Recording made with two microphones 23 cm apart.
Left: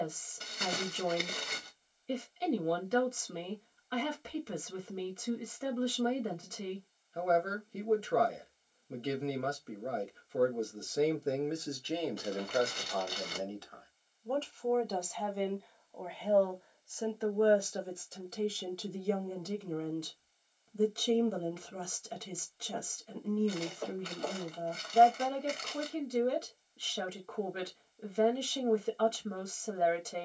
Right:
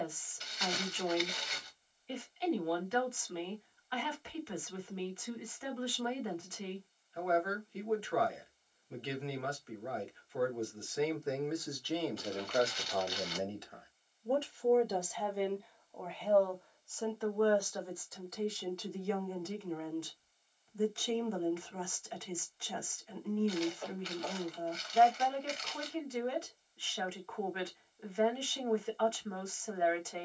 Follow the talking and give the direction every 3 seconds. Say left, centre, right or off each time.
left, left, left, left, centre, centre, left, left, left, left.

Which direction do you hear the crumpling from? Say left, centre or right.
left.